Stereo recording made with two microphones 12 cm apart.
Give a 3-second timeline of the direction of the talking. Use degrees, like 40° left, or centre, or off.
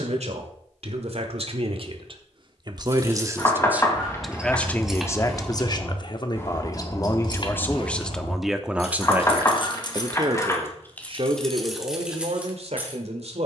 50° right, 10° left, 20° left, 40° right, 60° right.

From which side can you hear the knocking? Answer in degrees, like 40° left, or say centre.
20° left.